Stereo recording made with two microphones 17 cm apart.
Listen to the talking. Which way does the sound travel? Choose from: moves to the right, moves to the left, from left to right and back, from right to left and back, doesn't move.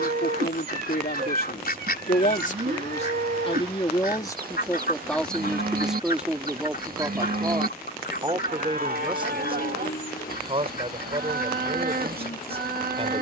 moves to the right.